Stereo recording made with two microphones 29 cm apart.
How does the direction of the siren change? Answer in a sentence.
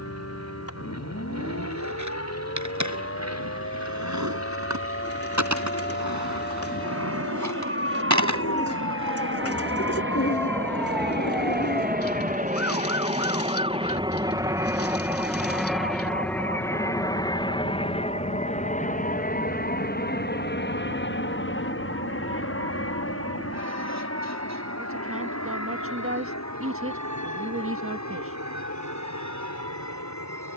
You can hear the siren go from the left side to the right.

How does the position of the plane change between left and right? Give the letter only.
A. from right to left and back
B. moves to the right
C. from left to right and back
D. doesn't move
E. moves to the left
E.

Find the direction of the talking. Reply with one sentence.
You can hear the talking on the right.